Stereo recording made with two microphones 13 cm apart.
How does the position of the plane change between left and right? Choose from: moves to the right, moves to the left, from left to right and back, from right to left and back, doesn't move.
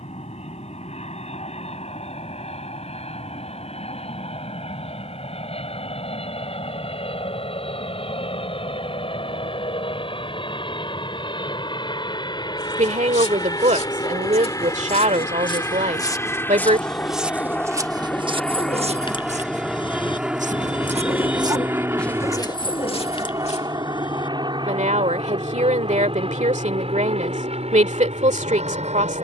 moves to the right.